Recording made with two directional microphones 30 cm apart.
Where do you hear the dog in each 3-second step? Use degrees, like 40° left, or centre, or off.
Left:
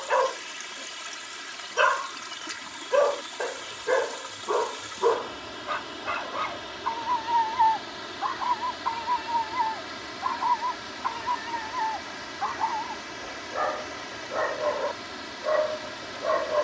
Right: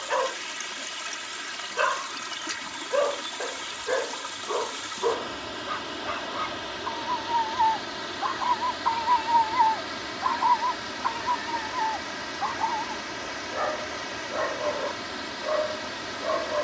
30° left, 30° left, 10° left, 10° right, 20° left, 30° left.